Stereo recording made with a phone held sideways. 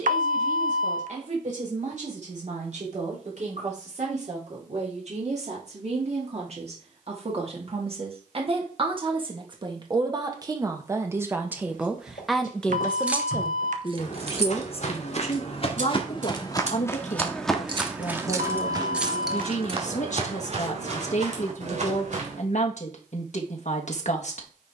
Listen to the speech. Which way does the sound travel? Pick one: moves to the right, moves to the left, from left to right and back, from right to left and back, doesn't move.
moves to the left.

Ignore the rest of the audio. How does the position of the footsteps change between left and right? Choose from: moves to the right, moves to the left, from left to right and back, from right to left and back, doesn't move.
moves to the right.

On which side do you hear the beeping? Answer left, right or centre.
right.